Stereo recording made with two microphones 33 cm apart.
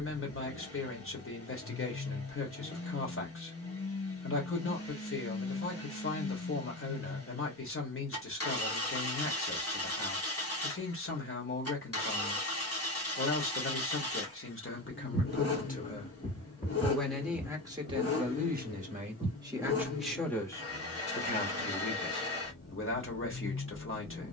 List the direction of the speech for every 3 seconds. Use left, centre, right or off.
left, left, left, left, left, centre, centre, left.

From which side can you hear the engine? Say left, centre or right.
left.